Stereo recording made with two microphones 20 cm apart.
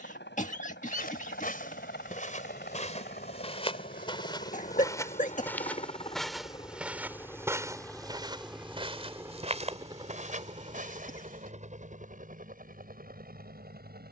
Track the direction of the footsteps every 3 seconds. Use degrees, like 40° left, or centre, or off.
40° left, 20° left, 10° right, 40° right, off.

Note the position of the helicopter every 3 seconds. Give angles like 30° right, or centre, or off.
60° left, 40° left, 10° left, 30° right, 40° right.